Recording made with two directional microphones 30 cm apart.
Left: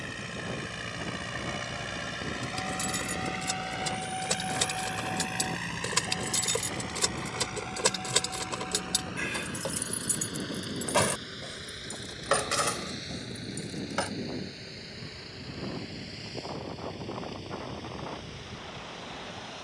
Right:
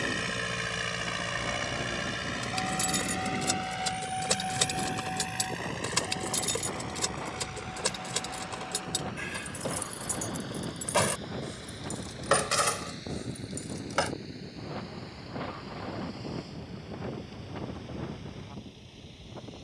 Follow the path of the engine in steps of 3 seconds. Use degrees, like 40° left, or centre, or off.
20° right, 20° left, 40° left, 40° left, 50° left, 50° left, 50° left.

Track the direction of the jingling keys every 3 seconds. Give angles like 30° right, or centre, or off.
20° right, 10° right, 30° left, 20° left, 10° right, off, off.